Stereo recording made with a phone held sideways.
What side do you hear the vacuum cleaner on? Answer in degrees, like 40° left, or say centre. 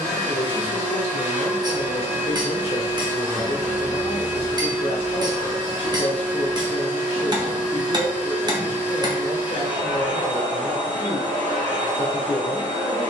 60° right.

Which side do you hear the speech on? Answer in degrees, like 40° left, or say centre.
40° left.